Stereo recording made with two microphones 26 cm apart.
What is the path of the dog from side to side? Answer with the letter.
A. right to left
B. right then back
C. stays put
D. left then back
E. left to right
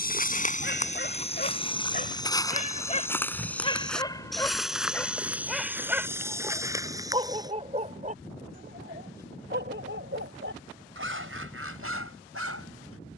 E.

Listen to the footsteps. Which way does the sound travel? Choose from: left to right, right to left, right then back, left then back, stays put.
left to right.